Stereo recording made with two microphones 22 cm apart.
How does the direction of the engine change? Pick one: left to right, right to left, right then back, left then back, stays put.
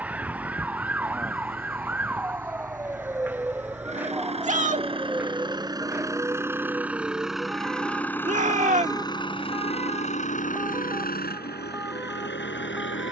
right to left.